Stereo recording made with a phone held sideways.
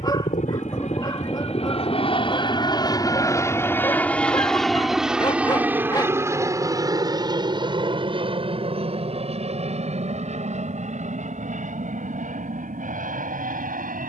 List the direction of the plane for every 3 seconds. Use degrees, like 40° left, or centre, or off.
40° left, centre, 20° right, 40° right, 50° right.